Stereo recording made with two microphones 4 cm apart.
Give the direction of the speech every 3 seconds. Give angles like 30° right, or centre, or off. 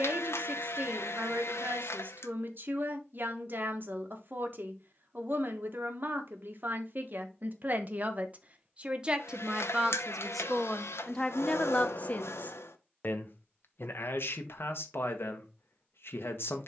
50° right, 50° right, 40° right, centre, 50° left, 60° left.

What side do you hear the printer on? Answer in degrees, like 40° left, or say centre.
80° left.